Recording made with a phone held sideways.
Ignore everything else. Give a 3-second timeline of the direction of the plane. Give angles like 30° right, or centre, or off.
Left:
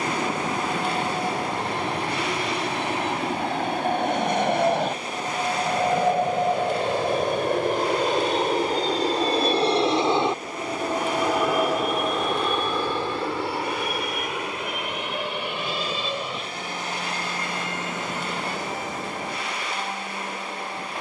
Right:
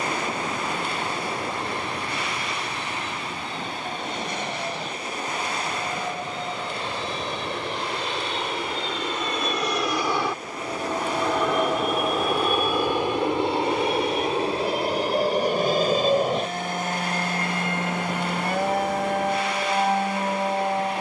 80° left, 70° left, 50° left, 20° left, 20° right, 40° right, 50° right.